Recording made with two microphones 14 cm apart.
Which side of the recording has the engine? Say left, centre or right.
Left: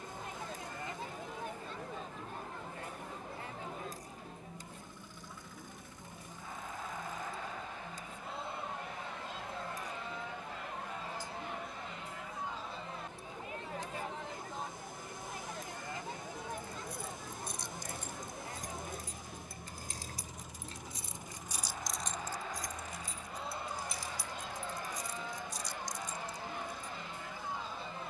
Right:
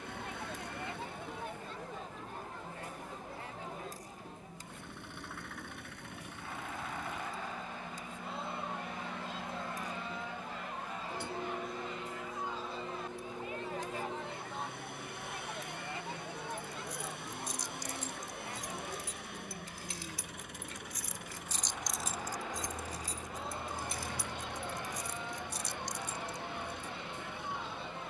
right.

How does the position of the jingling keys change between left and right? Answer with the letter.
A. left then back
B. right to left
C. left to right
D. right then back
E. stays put
C.